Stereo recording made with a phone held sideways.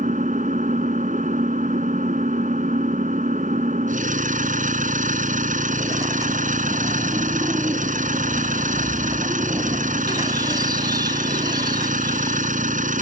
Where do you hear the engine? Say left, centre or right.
right.